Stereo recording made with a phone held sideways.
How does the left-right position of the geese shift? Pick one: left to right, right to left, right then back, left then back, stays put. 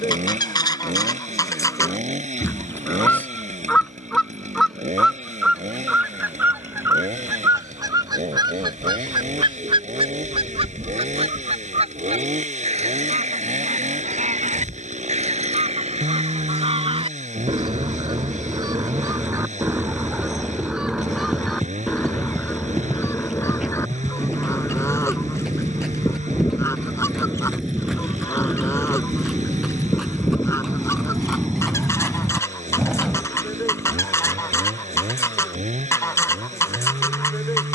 right then back.